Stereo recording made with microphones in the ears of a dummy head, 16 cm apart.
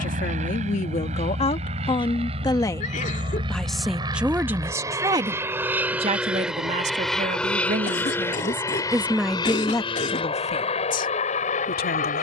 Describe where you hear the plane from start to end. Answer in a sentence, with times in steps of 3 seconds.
In this clip you hear the plane on the right from 0 s, in the centre from 6 s and on the left from 9 s.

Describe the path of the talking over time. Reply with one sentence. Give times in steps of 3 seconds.
In this clip you hear the talking on the left from 0 s, in the centre from 3 s, on the right from 6 s and on the left from 9 s.